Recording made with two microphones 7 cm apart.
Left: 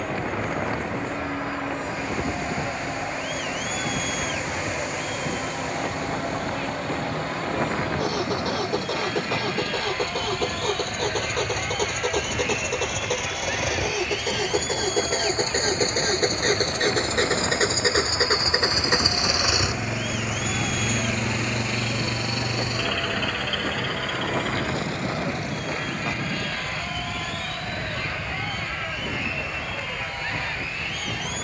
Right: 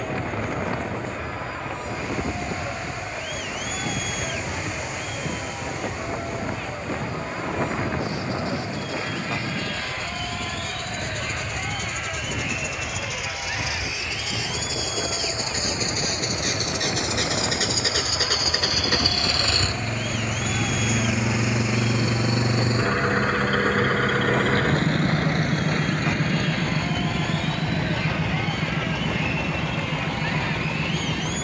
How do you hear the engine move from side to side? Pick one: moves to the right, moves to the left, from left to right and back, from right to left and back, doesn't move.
moves to the right.